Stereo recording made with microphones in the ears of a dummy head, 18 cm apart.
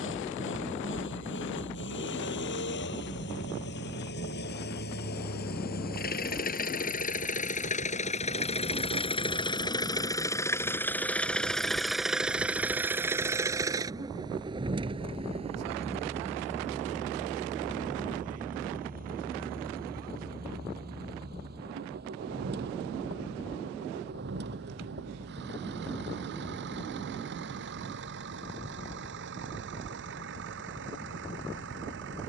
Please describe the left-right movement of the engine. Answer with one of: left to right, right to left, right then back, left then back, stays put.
left to right.